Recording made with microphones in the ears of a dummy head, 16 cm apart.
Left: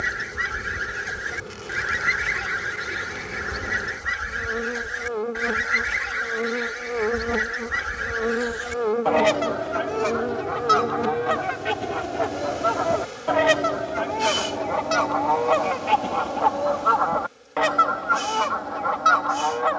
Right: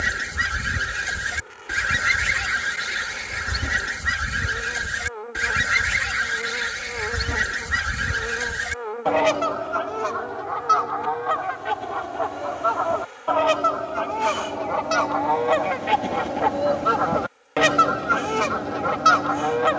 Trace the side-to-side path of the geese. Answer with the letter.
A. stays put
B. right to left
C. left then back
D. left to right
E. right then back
C.